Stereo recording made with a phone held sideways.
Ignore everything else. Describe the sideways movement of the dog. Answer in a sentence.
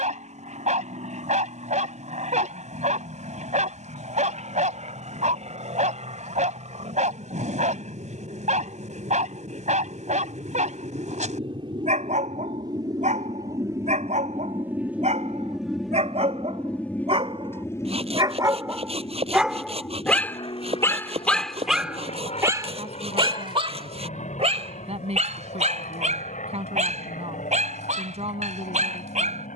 You can hear the dog go left and come back.